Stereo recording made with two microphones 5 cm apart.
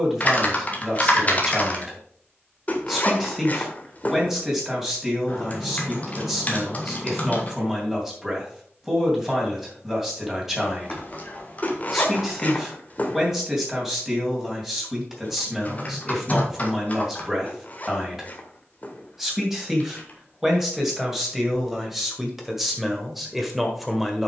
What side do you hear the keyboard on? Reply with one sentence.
In this clip you hear the keyboard on the left.